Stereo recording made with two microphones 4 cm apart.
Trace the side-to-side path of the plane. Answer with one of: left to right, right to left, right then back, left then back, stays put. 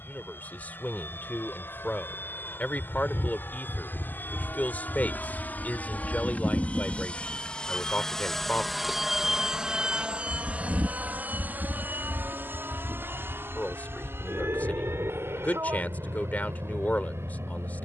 left to right.